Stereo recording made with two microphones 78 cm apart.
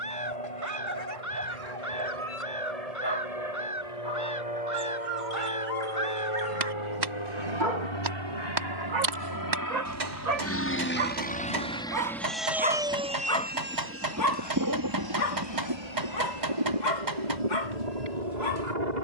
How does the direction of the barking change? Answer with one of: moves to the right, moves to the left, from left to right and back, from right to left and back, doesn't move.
moves to the left.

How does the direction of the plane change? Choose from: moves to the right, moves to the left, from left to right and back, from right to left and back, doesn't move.
moves to the right.